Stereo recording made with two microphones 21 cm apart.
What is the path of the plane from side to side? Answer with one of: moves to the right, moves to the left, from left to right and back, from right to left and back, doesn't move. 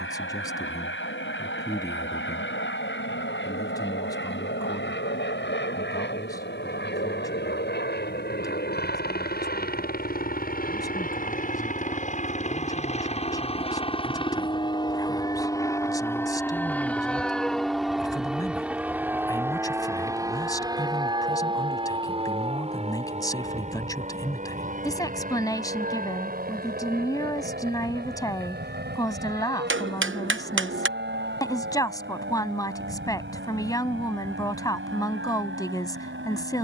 moves to the right.